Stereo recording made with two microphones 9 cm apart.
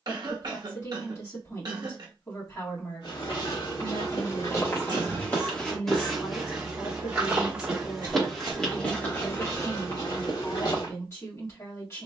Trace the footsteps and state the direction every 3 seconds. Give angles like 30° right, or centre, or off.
off, 40° left, centre, 40° left.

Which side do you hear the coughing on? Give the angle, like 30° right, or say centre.
50° right.